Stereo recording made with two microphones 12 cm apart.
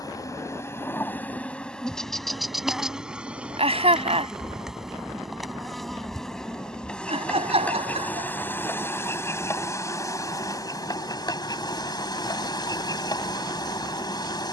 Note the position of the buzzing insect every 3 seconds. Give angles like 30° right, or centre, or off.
10° left, centre, 10° left, 30° left, 30° left.